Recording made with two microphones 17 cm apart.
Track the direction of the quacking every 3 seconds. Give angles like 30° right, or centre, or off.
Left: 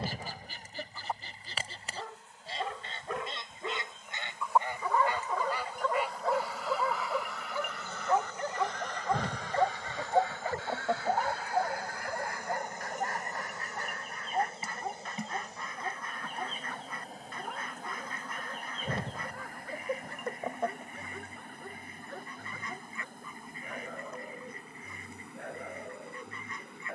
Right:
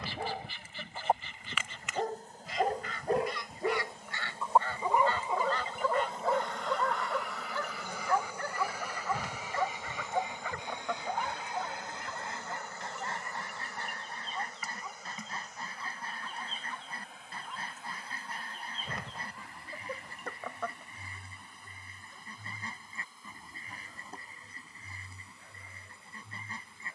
40° left, 20° left, centre, 20° right, 30° right, 30° right, 30° right, 30° right, 30° right.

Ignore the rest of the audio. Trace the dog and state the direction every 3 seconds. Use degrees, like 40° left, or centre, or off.
50° right, 20° right, 10° left, 40° left, 50° left, 60° left, 60° left, 60° left, 70° left.